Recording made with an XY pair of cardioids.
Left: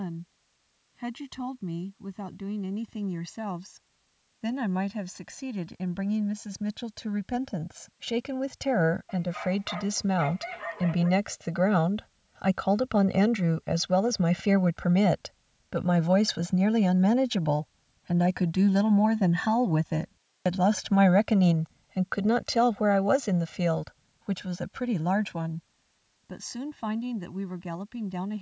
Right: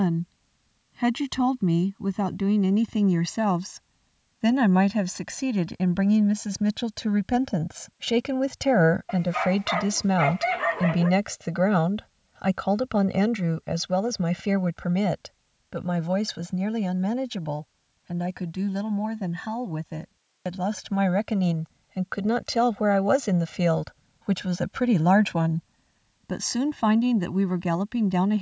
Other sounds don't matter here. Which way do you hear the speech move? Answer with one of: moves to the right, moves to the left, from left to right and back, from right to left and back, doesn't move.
from right to left and back.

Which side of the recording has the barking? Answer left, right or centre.
right.